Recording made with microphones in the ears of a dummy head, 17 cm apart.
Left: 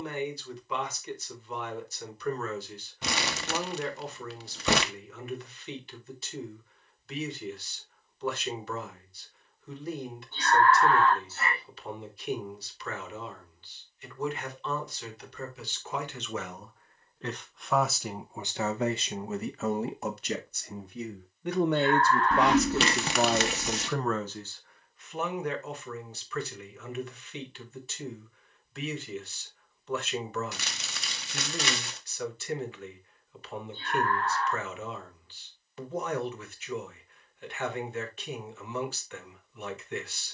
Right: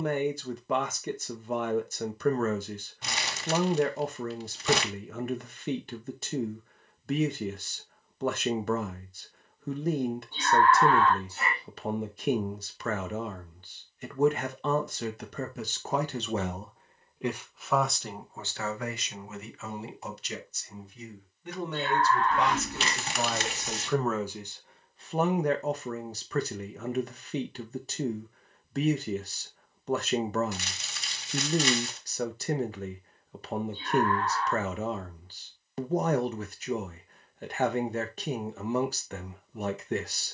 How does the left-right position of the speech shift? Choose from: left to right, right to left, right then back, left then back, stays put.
left then back.